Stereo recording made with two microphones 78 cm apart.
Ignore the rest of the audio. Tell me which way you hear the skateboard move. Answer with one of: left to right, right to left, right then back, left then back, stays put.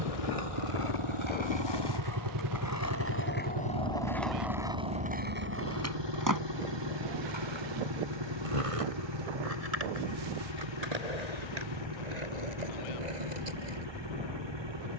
left to right.